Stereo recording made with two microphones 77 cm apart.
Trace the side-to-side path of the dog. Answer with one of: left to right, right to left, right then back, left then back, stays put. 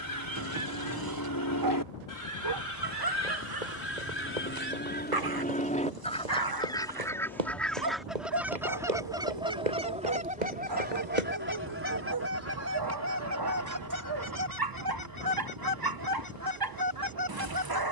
stays put.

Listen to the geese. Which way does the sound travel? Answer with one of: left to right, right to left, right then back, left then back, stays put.
left to right.